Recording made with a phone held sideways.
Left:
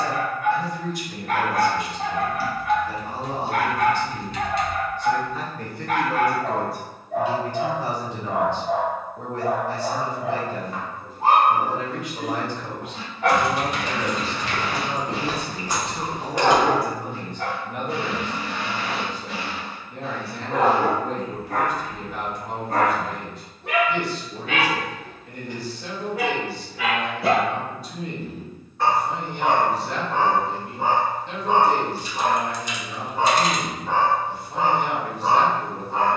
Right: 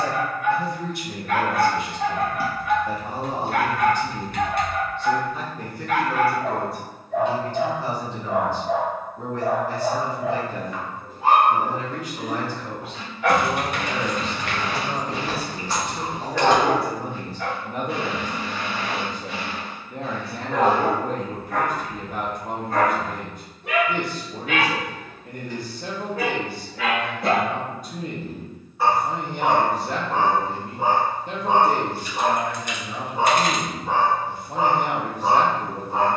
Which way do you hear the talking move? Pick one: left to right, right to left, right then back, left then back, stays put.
left then back.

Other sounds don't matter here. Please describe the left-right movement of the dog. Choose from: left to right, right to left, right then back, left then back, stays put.
left to right.